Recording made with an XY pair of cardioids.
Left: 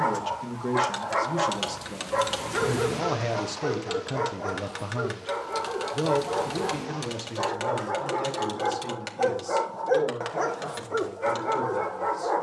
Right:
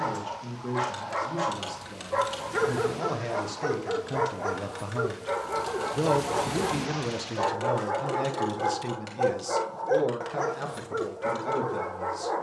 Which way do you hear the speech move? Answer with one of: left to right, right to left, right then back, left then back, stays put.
left to right.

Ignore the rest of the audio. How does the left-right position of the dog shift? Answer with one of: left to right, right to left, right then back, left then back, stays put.
right then back.